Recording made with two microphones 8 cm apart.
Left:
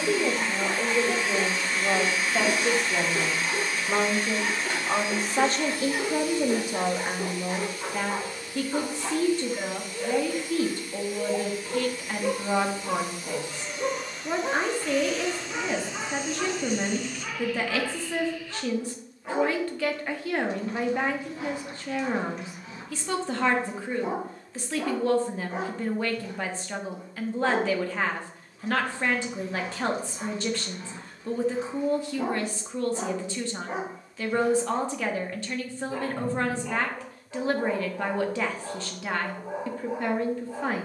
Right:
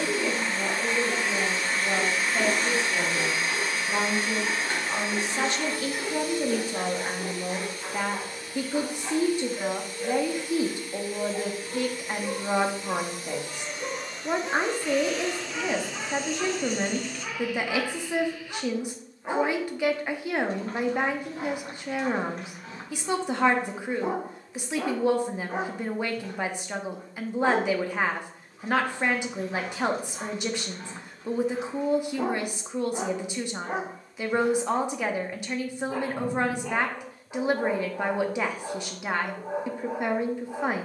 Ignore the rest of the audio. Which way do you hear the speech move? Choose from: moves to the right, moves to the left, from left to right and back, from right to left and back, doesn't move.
moves to the right.